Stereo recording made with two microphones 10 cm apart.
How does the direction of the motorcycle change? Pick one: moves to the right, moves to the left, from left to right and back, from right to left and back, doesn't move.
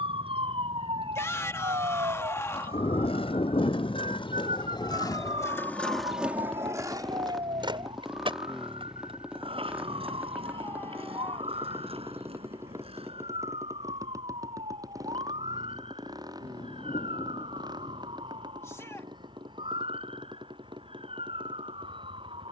moves to the right.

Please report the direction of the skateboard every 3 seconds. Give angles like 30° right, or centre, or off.
70° left, 50° left, 50° right, 70° right, 80° right, off, off, off.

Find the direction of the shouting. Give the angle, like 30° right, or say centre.
30° left.